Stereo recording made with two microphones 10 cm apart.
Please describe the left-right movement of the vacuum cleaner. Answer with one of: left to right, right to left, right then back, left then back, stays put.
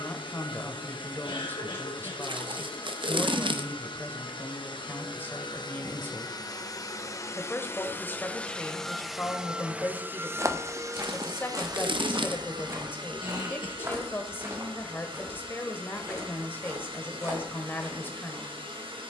left to right.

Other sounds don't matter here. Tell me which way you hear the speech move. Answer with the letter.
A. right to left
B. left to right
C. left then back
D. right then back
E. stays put
E.